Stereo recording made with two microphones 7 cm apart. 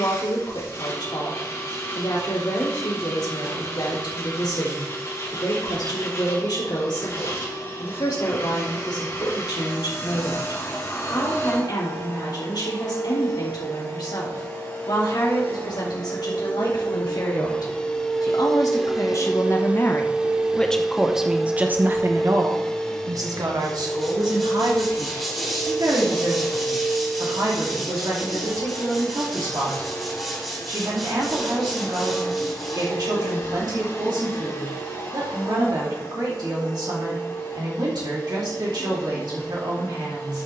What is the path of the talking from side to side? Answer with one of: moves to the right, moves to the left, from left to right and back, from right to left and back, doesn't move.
moves to the right.